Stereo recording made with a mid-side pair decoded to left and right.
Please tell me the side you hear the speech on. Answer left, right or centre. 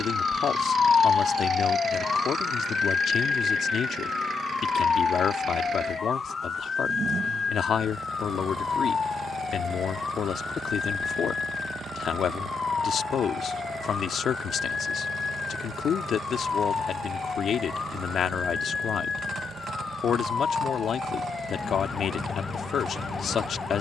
left.